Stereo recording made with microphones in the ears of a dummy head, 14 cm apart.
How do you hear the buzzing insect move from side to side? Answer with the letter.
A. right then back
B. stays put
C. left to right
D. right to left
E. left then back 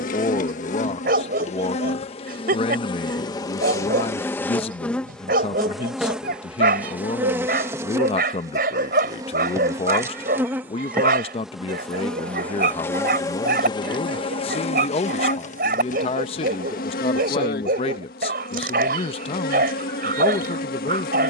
A.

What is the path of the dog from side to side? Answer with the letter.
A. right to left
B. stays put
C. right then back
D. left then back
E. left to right
B.